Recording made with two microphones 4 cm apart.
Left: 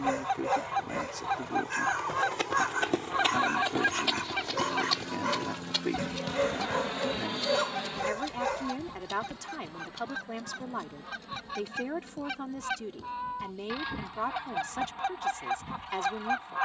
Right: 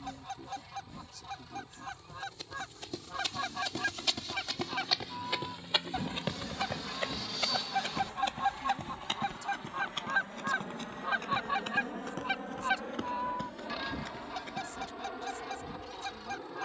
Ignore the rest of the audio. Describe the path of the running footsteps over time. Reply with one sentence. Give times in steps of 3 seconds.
In this clip you hear the running footsteps on the left from 0 s, in the centre from 3 s, on the right from 6 s and not at all from 15 s.